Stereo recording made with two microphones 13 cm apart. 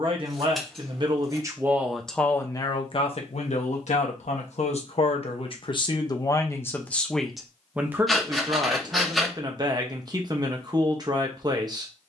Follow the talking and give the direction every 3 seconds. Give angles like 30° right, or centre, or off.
10° right, 50° left, centre, 30° right.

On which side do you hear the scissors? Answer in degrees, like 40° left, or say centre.
centre.